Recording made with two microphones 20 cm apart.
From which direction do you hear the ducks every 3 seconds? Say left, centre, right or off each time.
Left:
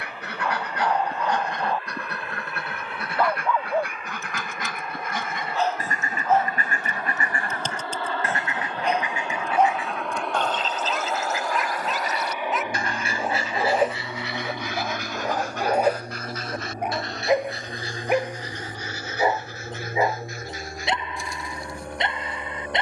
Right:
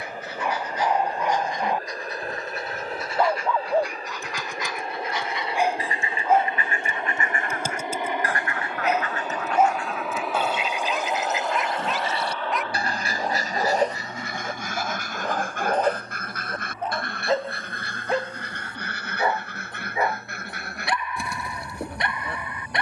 left, left, left, centre, right, right, right, right.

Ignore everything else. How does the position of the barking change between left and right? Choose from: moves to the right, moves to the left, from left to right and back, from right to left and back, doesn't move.
moves to the left.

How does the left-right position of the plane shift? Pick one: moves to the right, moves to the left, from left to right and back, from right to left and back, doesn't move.
moves to the left.